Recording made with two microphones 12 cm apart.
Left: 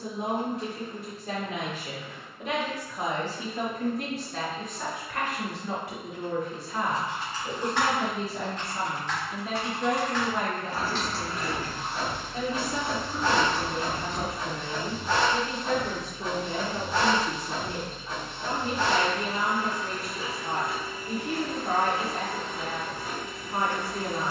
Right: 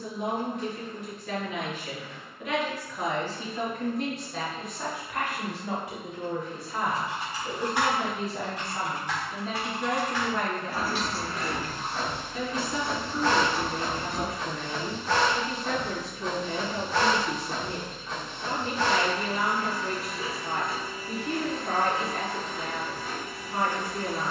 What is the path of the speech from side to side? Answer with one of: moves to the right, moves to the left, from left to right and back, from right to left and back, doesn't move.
from left to right and back.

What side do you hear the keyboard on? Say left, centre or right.
centre.